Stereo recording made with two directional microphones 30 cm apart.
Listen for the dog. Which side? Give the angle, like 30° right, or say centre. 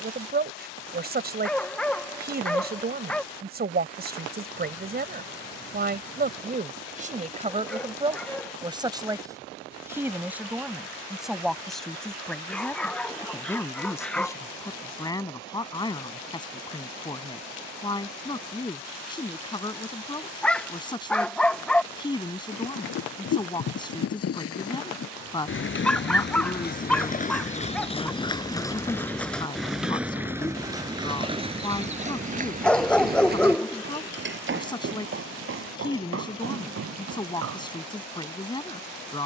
centre.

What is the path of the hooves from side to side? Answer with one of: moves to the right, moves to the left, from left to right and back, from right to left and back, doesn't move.
moves to the right.